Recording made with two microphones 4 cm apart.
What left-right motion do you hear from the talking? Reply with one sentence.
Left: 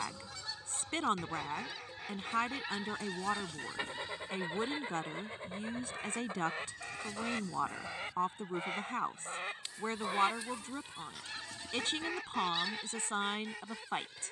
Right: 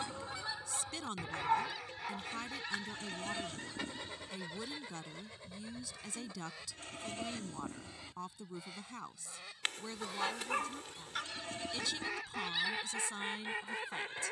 You can hear the talking stay put.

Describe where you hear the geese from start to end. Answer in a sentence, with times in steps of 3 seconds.
In this clip you hear the geese in the centre from 0 s, on the left from 3 s and on the right from 12 s.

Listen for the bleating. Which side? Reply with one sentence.
You can hear the bleating on the right.